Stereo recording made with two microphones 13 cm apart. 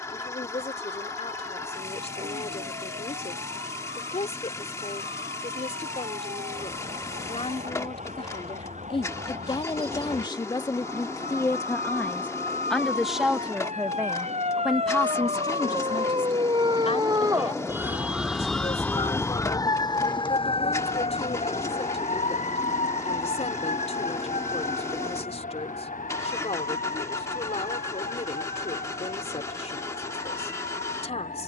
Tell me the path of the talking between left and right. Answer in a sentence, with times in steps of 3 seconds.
In this clip you hear the talking on the left from 0 s, in the centre from 12 s and on the left from 15 s.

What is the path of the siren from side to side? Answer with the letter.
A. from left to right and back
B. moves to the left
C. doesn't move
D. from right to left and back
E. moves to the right
B.